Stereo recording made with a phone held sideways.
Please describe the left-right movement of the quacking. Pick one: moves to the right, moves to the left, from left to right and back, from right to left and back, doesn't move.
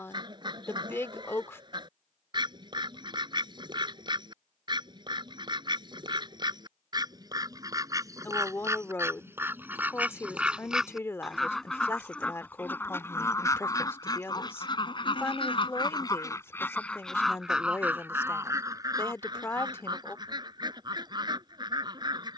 from right to left and back.